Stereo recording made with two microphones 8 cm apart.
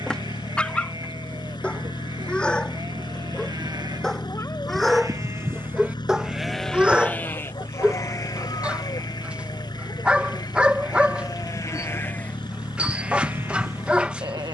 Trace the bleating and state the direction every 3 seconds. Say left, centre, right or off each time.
right, right, left, left, right.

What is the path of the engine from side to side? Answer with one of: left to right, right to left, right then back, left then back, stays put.
stays put.